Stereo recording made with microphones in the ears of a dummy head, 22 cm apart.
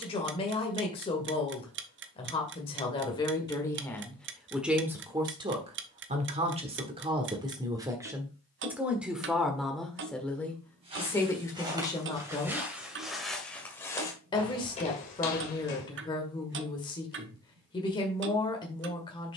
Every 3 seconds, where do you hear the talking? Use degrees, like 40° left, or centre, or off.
20° left, centre, 20° right, 10° left, 20° left, 20° left, 20° left.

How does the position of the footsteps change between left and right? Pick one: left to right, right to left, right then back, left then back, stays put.
right to left.